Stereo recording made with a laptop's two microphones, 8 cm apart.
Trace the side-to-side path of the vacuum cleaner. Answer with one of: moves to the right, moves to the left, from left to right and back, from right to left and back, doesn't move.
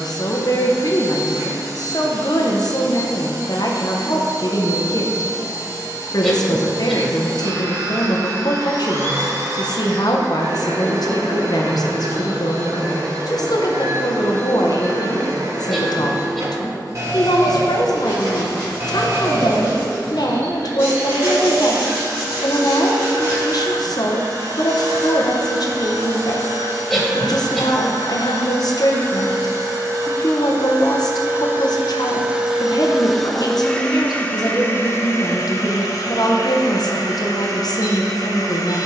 moves to the left.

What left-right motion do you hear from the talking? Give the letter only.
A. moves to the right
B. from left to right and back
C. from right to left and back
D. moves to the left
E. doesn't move
E.